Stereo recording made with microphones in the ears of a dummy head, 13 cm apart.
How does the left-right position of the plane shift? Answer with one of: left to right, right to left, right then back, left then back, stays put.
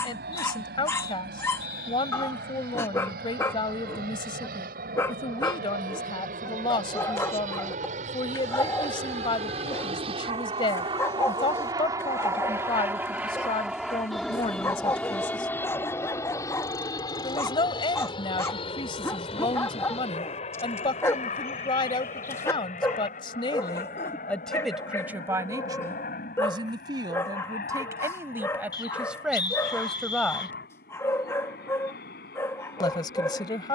right to left.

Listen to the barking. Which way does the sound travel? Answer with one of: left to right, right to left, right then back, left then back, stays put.
stays put.